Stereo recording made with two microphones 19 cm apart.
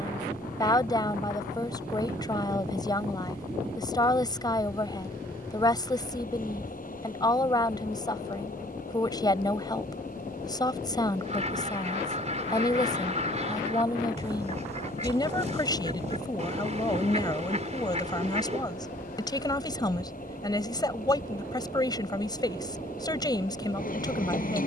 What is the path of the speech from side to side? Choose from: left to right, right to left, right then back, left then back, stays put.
stays put.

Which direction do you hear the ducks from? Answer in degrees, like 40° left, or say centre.
40° right.